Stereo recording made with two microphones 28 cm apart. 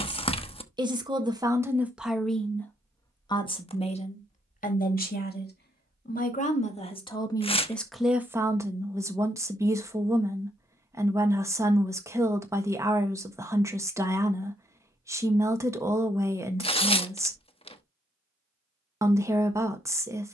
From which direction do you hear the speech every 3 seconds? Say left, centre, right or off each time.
centre, left, centre, centre, centre, centre, centre.